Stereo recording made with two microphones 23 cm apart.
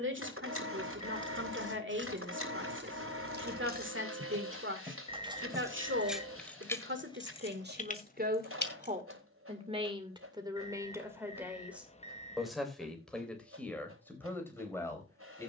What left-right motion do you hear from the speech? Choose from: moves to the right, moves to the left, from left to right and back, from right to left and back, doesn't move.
moves to the left.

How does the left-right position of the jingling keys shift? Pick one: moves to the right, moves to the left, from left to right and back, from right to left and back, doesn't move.
moves to the left.